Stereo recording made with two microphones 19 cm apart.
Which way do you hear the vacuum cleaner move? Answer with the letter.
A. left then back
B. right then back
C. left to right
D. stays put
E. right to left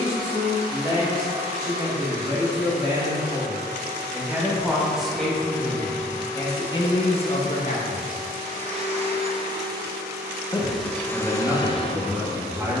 E.